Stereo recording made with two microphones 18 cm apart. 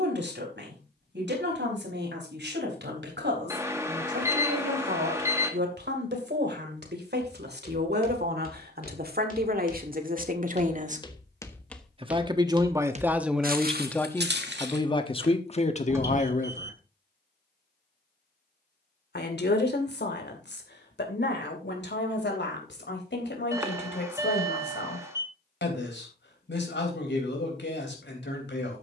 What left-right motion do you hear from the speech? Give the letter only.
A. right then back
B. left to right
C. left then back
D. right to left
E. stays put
D.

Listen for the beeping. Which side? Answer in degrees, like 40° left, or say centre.
20° right.